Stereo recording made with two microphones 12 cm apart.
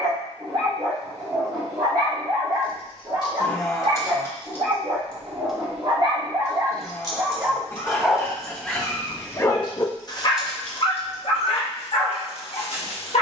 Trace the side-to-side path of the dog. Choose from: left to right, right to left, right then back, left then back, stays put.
right to left.